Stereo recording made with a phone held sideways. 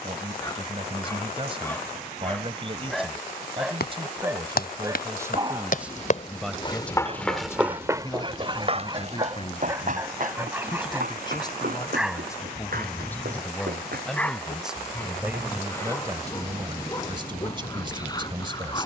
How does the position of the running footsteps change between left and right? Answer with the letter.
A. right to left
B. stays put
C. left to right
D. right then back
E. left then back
C.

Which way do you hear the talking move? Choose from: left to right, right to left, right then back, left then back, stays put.
left then back.